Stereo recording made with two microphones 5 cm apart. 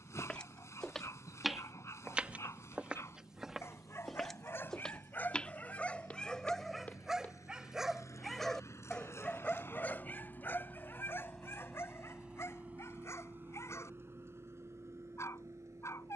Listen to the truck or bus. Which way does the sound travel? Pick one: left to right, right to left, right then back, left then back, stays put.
left to right.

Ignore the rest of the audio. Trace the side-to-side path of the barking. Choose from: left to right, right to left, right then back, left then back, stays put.
right then back.